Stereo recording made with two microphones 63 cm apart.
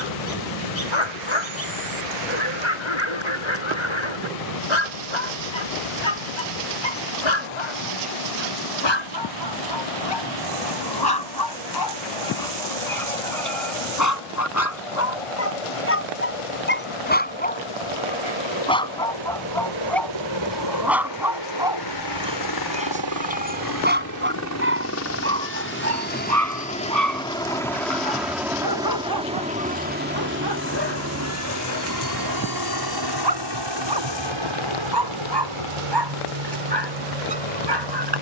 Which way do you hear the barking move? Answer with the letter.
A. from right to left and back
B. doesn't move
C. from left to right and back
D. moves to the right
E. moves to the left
D.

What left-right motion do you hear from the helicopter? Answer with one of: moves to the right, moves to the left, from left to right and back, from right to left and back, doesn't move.
moves to the right.